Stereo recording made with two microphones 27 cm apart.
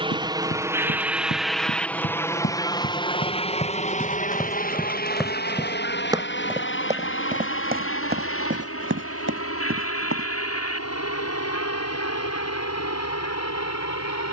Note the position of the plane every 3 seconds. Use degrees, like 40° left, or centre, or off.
centre, 30° left, 40° left, 50° left, 60° left.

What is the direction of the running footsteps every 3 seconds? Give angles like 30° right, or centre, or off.
50° left, 10° left, 30° right, 50° right, off.